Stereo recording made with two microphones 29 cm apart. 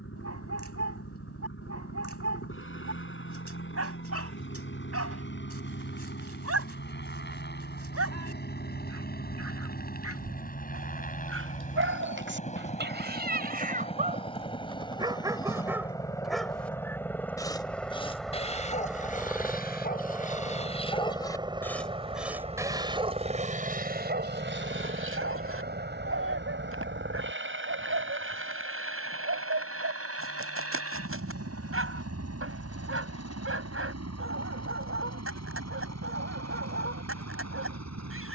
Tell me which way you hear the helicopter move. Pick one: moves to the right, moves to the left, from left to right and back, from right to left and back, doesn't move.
moves to the right.